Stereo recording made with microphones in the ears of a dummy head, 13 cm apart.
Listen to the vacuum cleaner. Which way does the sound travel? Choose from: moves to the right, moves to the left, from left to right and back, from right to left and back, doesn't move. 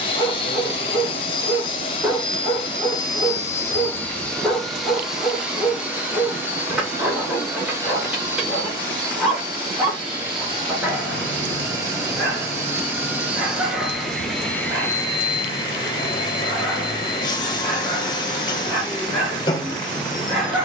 from left to right and back.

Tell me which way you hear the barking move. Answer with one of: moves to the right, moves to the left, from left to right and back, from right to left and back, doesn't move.
doesn't move.